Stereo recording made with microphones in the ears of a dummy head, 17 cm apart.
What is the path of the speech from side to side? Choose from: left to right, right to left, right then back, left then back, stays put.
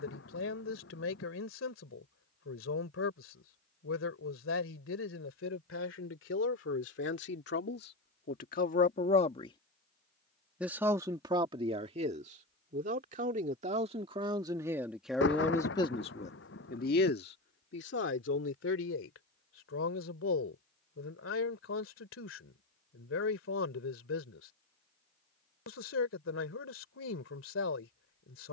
right then back.